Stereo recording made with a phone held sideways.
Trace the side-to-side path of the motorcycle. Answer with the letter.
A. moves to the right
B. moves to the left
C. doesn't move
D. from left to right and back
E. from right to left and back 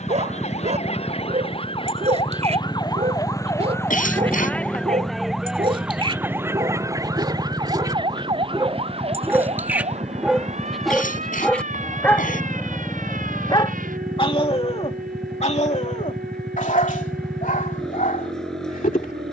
C.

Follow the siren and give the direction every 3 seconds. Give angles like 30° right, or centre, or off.
40° left, 10° left, 30° right, 50° right, 60° right, 70° right, 70° right.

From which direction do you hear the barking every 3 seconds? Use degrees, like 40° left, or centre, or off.
50° right, 40° right, 30° right, centre, 30° left, 60° left, 70° left.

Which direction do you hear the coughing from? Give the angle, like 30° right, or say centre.
60° left.